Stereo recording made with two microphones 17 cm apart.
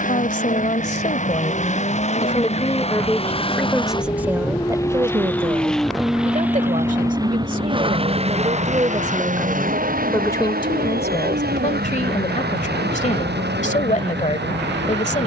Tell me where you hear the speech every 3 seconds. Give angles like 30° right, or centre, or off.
40° left, 20° right, 50° right, 20° left, 50° left.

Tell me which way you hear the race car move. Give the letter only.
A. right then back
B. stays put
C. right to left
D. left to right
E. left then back
D.